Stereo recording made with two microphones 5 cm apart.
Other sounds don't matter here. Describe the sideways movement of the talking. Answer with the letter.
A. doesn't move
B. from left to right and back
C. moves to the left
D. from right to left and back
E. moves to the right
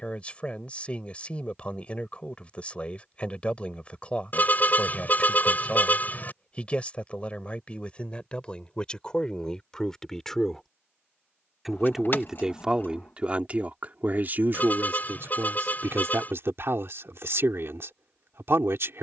E.